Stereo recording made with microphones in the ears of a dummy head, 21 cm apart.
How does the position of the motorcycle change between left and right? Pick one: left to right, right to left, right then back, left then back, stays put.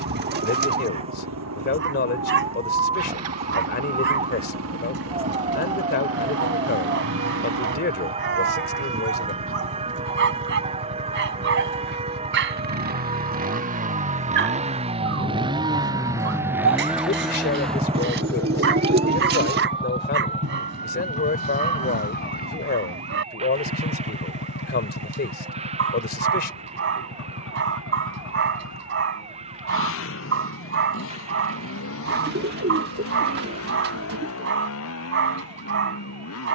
right to left.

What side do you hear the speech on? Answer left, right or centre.
left.